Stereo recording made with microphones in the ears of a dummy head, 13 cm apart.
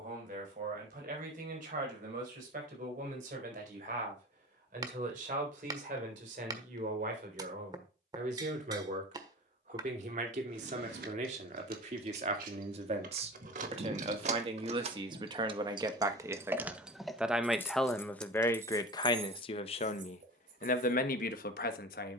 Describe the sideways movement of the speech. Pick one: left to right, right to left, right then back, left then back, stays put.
right to left.